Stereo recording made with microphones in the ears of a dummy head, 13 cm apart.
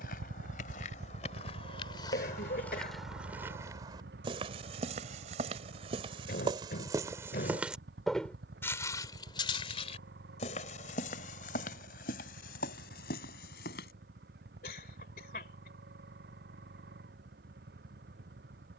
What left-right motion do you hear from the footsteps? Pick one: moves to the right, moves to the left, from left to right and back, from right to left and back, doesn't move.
from left to right and back.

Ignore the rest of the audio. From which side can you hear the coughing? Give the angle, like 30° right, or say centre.
60° left.